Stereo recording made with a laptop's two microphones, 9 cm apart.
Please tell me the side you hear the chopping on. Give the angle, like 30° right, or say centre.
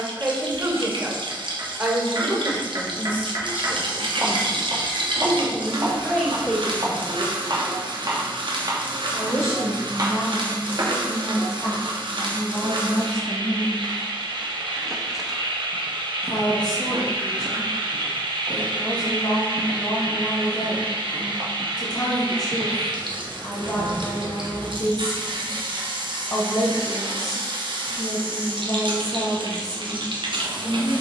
50° right.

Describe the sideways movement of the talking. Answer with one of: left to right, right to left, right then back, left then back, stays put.
right to left.